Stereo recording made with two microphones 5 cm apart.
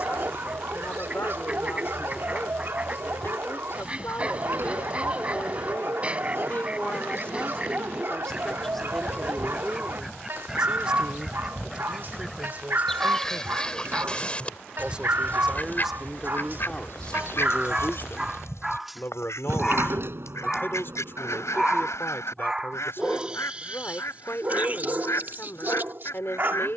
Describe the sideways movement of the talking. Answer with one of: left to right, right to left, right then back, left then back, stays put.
right then back.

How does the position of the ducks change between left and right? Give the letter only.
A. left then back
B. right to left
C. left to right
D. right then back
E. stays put
B.